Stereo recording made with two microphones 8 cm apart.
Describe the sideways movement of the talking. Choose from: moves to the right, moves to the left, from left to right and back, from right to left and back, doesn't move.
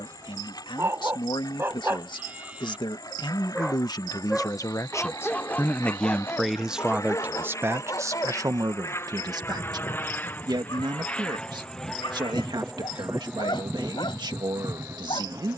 moves to the right.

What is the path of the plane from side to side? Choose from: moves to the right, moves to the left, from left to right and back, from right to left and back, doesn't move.
moves to the right.